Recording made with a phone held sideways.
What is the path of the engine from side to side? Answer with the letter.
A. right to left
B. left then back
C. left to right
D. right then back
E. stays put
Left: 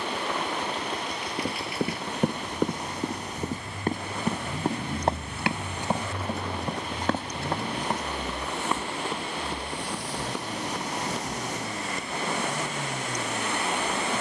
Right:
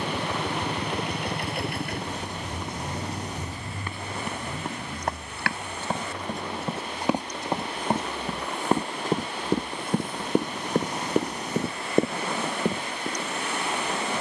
A.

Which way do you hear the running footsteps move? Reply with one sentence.
In this clip you hear the running footsteps move to the right.